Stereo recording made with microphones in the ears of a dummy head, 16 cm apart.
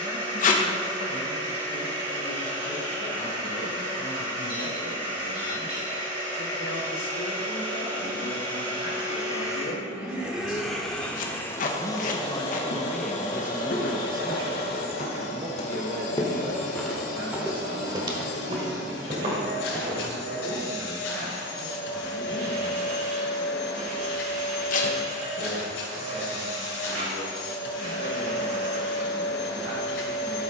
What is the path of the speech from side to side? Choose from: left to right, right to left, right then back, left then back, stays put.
left to right.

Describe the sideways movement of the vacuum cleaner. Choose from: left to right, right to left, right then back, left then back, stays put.
right to left.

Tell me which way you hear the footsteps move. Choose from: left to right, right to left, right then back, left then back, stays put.
left to right.